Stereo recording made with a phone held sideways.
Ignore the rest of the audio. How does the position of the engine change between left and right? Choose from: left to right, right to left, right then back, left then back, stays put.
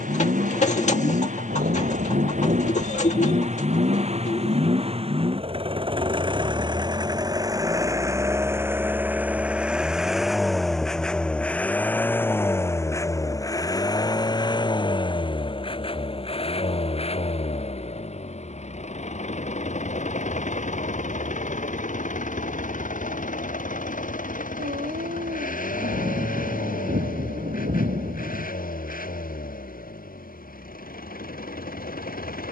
right to left.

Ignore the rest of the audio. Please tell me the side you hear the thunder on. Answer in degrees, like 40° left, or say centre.
70° right.